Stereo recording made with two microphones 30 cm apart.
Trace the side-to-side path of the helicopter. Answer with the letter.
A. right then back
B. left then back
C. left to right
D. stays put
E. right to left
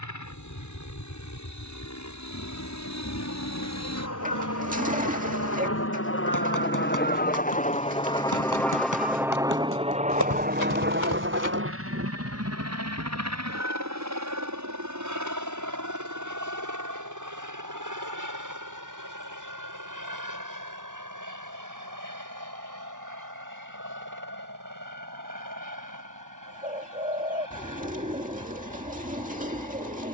C.